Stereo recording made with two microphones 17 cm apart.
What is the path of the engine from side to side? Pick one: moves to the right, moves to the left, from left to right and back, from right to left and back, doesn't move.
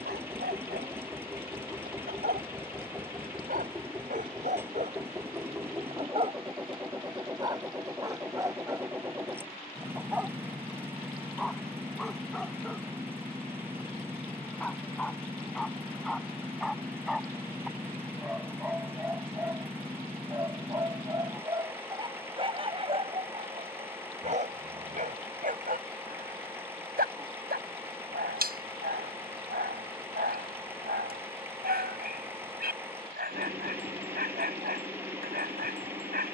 doesn't move.